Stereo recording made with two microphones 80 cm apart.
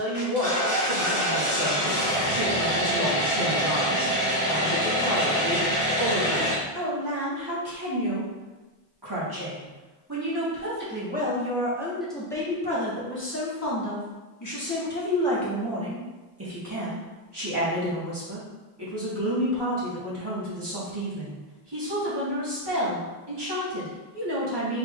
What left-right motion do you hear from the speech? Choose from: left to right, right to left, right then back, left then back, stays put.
left then back.